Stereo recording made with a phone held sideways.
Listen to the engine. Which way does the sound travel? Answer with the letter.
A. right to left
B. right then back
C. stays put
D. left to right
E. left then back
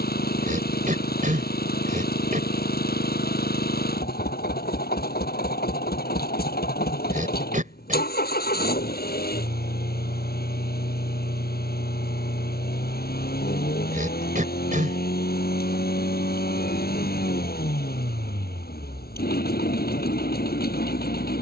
C.